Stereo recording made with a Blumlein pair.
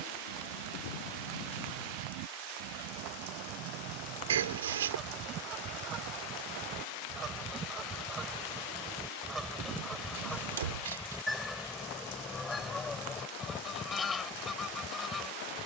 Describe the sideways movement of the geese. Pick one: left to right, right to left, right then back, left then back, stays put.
right to left.